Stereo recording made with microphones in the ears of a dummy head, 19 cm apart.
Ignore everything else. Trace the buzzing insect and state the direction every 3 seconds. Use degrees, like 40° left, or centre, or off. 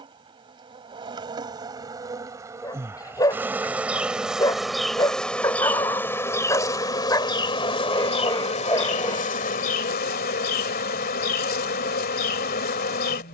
20° right, centre, 20° left, 40° left, 50° left.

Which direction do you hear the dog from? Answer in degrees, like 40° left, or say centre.
20° left.